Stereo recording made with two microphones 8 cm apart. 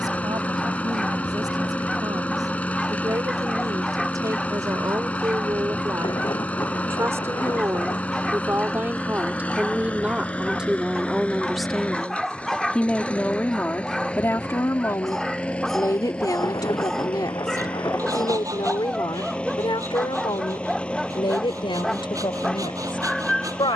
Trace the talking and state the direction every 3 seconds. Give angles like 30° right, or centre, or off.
50° right, 40° right, 30° right, 10° right, 20° left, 50° left, 60° left, 80° left.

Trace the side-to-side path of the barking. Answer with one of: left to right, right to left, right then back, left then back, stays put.
stays put.